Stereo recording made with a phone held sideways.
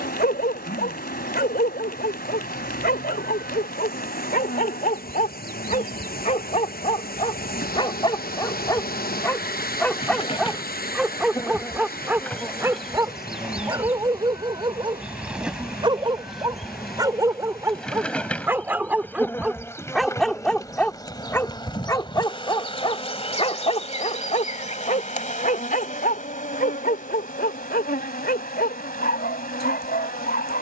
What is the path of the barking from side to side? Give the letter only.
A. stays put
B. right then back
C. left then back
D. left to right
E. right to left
B.